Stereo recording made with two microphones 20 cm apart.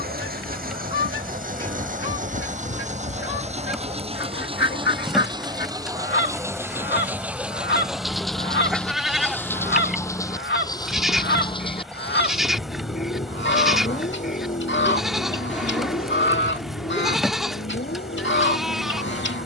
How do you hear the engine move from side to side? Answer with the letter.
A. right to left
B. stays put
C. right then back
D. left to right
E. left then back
A.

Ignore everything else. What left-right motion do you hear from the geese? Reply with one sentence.
You can hear the geese stay put.